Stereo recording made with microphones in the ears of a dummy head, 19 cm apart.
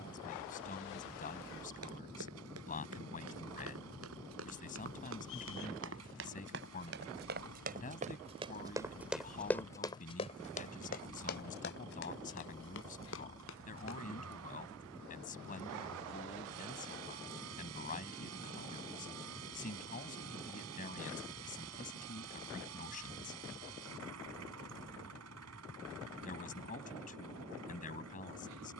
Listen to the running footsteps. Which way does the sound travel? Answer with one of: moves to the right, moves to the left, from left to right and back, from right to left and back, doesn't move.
moves to the left.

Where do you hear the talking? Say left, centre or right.
left.